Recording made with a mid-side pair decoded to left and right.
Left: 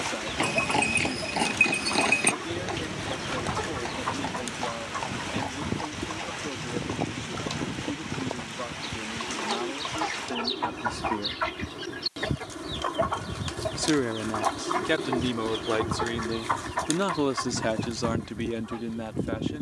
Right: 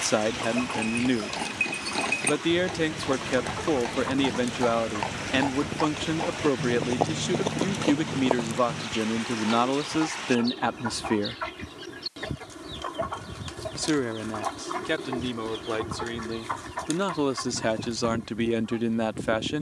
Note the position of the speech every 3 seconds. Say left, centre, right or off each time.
right, right, right, right, centre, centre, right.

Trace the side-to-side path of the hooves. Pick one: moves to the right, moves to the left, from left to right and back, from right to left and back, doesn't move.
moves to the right.